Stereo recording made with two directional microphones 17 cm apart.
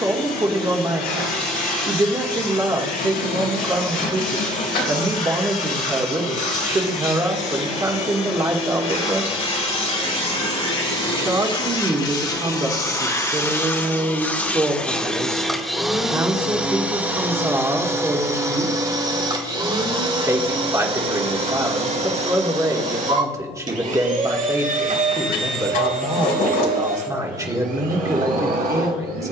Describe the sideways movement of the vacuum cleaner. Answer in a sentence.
You can hear the vacuum cleaner move from left to right.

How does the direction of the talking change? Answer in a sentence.
You can hear the talking stay put.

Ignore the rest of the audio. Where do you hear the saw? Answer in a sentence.
In this clip you hear the saw on the left.